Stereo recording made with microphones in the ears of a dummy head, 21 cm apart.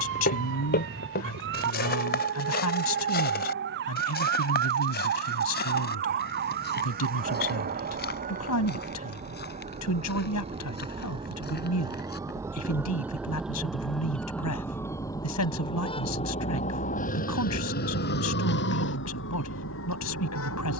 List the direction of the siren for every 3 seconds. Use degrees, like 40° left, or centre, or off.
50° right, 50° right, 40° right, 30° right, centre, 30° left, 50° left.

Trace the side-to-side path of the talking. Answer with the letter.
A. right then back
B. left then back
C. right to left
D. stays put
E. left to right
D.